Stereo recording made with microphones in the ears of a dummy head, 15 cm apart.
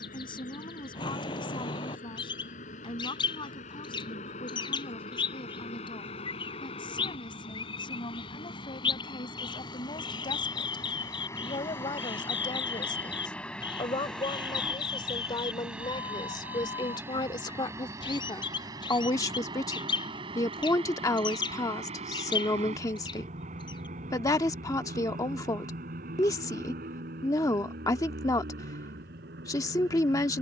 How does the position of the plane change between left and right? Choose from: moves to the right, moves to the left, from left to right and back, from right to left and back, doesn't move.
moves to the right.